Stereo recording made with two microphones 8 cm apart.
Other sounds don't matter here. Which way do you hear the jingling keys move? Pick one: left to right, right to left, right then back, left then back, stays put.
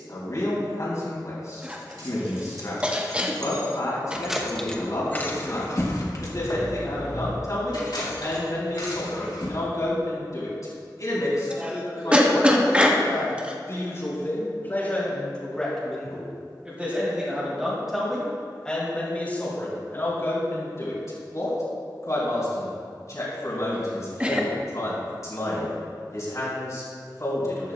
right to left.